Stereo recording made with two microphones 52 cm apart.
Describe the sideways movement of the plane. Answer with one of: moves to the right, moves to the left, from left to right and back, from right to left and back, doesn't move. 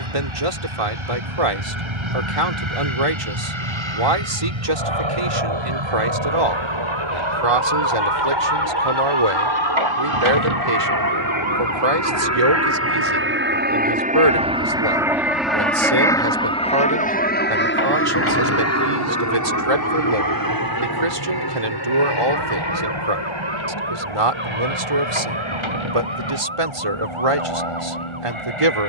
moves to the left.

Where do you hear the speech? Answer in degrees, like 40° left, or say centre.
80° right.